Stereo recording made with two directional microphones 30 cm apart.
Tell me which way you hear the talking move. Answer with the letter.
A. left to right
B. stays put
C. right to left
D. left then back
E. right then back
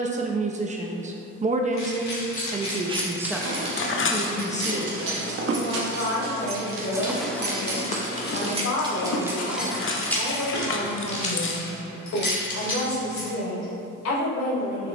C.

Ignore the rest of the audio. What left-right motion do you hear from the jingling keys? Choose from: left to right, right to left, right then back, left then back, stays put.
right then back.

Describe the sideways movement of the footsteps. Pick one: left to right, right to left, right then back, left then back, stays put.
right to left.